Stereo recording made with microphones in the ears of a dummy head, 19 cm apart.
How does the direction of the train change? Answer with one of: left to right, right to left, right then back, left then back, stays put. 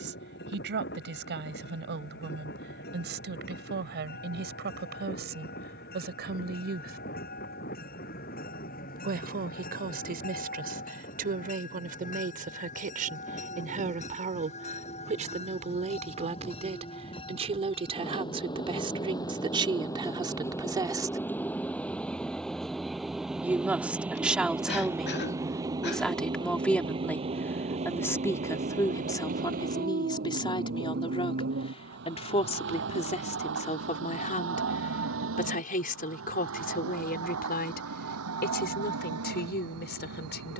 left to right.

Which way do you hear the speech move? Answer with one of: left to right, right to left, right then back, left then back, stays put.
right to left.